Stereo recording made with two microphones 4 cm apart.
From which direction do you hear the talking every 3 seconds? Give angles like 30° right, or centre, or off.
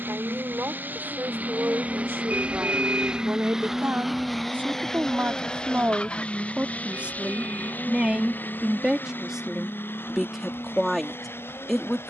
60° right, 50° right, 30° right, centre.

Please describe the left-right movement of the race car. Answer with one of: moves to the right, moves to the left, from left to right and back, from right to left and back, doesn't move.
moves to the left.